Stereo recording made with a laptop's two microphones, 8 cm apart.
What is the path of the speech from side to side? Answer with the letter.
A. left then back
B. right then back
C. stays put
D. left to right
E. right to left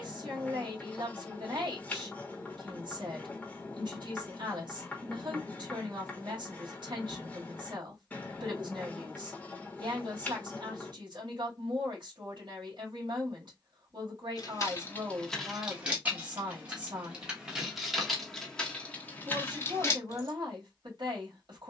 C.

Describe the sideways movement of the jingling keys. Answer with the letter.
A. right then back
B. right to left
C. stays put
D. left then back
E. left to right
A.